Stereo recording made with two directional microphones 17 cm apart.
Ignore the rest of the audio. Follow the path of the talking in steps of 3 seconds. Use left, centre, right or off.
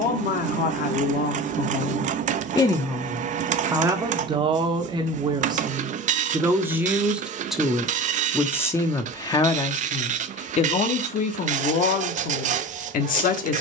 left, right, centre, left, left.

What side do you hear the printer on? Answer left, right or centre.
right.